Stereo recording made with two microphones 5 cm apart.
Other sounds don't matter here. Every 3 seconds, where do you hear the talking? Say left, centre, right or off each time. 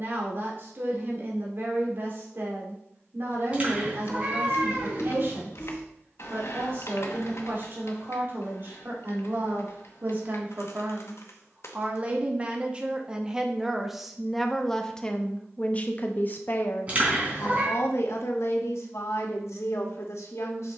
right, right, right, right, centre, left, left.